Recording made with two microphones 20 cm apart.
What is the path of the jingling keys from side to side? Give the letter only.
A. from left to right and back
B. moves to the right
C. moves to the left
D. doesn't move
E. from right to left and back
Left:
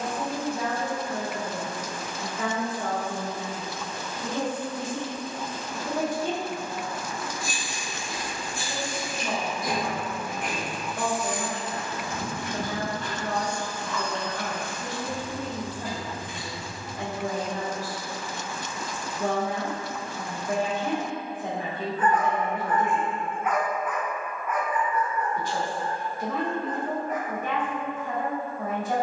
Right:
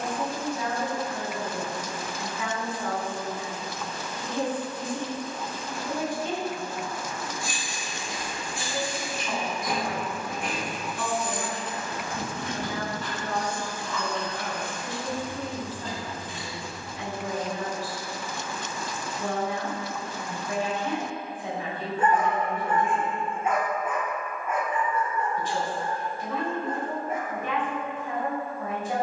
A.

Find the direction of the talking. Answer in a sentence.
In this clip you hear the talking on the left.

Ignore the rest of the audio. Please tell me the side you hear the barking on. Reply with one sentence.
You can hear the barking on the right.